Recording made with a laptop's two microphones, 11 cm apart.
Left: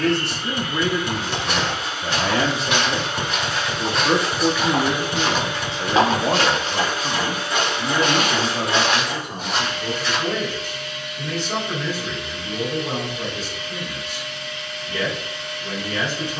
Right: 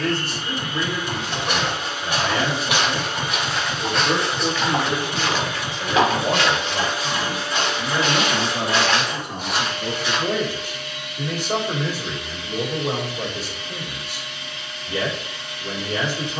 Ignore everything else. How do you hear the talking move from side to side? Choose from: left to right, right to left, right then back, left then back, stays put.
left to right.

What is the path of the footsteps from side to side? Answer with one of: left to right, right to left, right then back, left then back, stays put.
left then back.